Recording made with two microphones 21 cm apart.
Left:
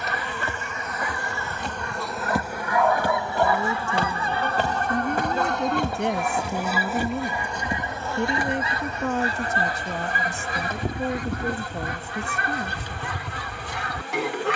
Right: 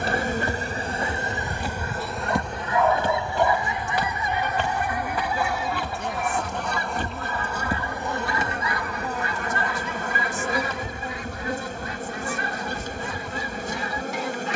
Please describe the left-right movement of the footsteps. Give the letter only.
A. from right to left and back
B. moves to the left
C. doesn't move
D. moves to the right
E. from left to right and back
A.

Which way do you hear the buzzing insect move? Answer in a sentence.
In this clip you hear the buzzing insect go left and come back.